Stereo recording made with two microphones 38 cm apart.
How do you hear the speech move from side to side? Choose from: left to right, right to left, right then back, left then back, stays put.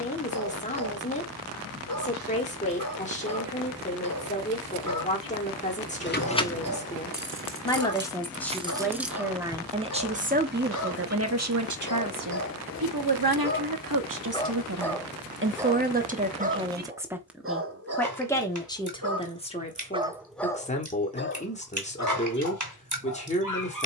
right then back.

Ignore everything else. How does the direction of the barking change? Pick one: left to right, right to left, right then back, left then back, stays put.
right then back.